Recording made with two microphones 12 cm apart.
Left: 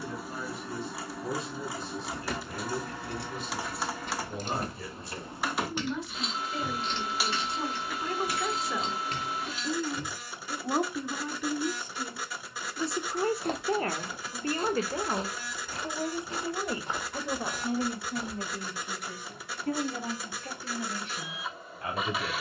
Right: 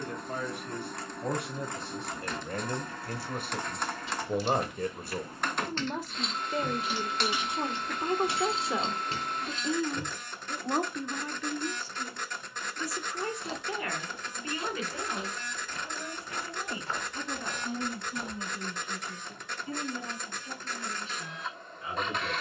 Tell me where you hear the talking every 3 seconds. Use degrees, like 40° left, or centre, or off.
60° right, 50° right, 30° right, centre, 30° left, 50° left, 60° left, 70° left.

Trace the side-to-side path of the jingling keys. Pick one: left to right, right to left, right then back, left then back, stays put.
left to right.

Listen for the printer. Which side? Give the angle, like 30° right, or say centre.
10° left.